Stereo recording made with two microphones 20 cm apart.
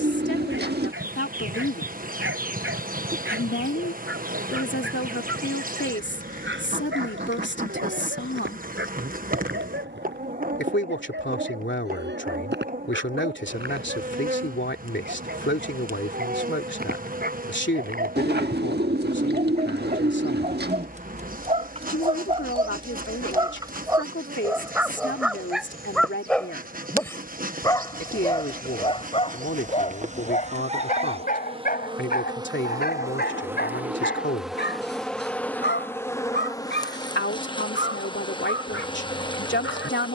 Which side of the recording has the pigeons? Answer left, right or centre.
right.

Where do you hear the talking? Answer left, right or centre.
left.